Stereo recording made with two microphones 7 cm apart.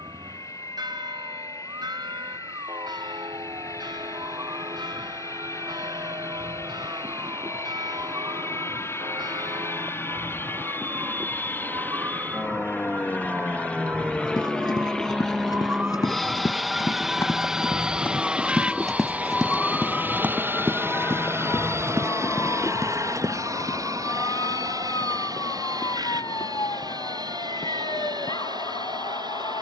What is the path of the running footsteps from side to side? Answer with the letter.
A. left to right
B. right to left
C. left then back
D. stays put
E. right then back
A.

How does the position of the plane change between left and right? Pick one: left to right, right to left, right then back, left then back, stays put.
left to right.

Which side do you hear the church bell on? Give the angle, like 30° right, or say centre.
80° right.